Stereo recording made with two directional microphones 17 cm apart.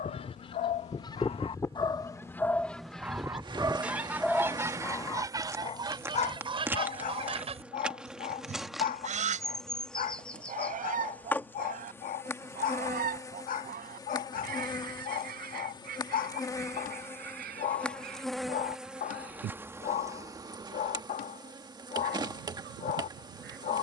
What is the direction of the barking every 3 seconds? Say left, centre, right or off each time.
left, centre, left, left, left, left, left, left.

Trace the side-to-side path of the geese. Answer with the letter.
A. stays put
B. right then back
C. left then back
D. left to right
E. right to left
D.